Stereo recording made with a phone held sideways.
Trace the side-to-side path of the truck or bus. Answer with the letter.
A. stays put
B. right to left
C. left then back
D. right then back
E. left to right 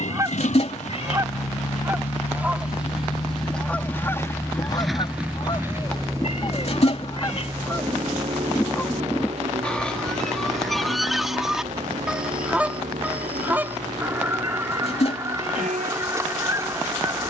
E.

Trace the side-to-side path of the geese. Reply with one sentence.
You can hear the geese move from right to left and back again.